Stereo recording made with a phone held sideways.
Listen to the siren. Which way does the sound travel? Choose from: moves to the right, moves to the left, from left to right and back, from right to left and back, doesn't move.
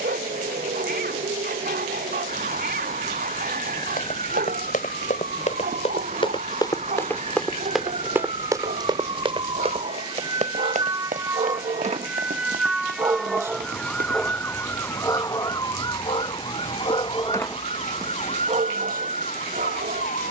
moves to the left.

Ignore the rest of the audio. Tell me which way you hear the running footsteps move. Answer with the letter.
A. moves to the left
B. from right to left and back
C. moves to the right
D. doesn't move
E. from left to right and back
C.